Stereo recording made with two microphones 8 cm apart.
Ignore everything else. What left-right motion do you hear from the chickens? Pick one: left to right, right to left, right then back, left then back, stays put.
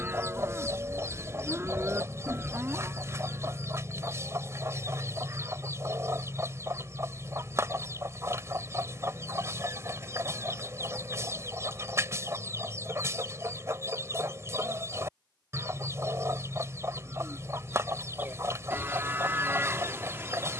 stays put.